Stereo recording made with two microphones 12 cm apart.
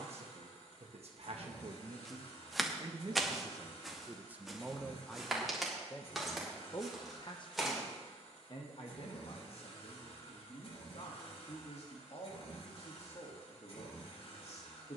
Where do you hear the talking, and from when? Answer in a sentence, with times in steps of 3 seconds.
In this clip you hear the talking on the right from 0 s, in the centre from 3 s and on the left from 6 s.